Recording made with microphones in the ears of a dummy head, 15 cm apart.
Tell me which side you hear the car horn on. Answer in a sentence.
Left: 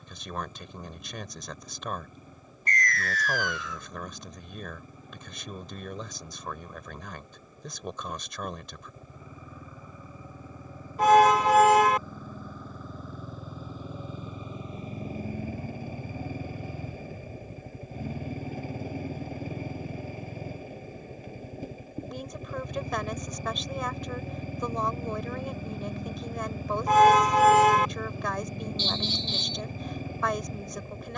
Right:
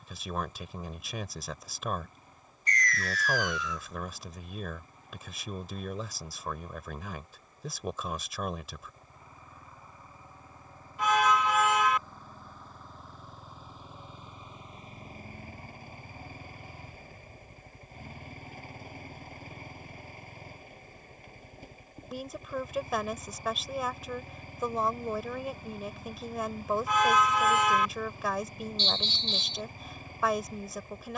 In this clip you hear the car horn on the left.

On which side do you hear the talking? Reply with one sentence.
In this clip you hear the talking in the centre.